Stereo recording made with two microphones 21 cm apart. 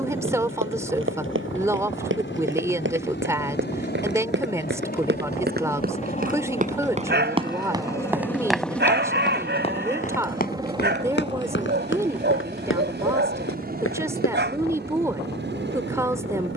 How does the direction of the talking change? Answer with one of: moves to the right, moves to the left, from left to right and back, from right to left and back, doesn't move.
doesn't move.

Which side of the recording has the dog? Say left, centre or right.
right.